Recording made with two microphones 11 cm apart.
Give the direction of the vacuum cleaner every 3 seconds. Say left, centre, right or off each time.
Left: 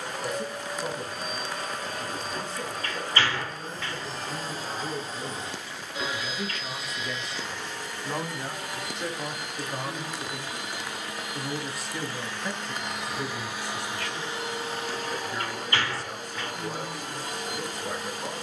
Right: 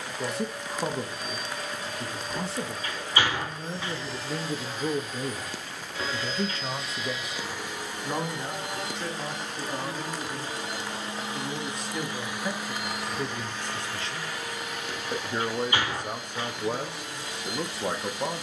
left, left, centre, right, centre, left.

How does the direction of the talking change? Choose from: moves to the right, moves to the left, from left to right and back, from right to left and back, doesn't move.
from right to left and back.